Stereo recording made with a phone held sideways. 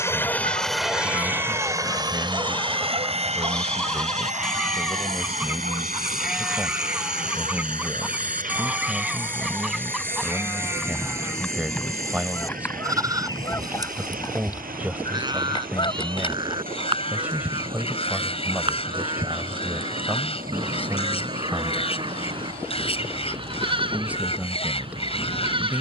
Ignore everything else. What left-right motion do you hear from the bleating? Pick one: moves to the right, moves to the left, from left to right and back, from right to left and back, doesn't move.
moves to the right.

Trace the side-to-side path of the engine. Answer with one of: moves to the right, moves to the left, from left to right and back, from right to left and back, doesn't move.
moves to the right.